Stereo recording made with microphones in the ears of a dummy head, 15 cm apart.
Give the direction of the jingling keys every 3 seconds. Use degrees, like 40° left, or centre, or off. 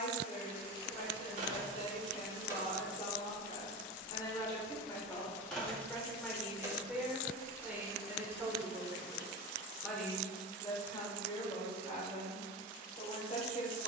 30° right, 10° left, 20° right, off, off.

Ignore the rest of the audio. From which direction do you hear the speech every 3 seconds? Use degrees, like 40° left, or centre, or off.
40° left, 20° left, 10° right, 20° left, 40° left.